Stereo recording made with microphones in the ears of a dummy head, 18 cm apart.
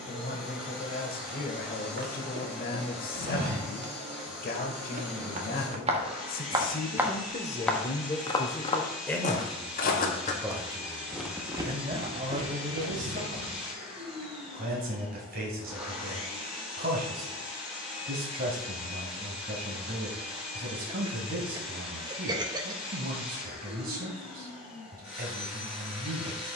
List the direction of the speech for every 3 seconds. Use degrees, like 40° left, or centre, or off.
50° left, 50° left, 30° left, 10° right, 40° right, 40° right, 40° right, 40° right, 40° right.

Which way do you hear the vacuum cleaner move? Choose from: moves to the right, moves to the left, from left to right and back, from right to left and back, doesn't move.
doesn't move.